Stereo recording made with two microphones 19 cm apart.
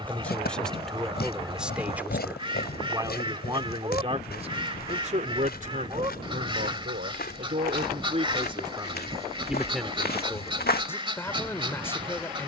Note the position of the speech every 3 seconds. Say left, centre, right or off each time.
centre, right, right, centre.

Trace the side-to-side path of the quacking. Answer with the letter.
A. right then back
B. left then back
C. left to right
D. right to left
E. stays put
E.